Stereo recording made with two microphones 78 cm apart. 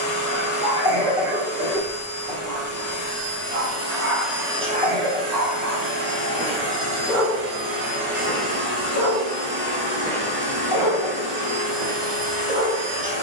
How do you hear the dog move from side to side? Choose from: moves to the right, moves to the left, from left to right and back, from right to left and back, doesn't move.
from right to left and back.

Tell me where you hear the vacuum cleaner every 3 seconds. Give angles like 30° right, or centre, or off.
20° left, centre, 50° right, 60° right, 60° right.